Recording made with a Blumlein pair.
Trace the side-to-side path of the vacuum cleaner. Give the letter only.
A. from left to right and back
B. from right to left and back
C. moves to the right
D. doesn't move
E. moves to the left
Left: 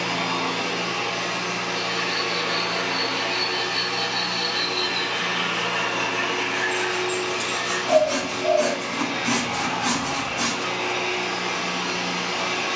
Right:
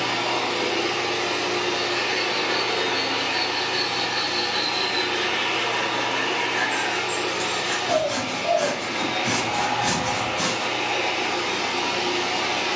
D.